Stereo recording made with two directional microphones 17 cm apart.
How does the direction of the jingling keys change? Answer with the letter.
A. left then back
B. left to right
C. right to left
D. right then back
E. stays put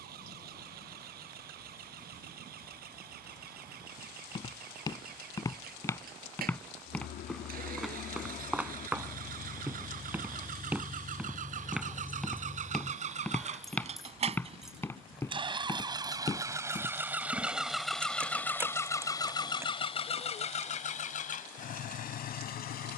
B.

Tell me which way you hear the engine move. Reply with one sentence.
You can hear the engine travel towards the left.